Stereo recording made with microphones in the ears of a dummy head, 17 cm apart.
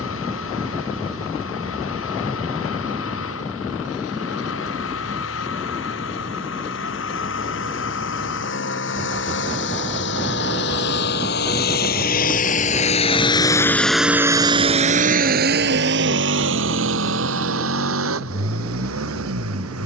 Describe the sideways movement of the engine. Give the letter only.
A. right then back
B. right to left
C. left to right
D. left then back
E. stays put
C.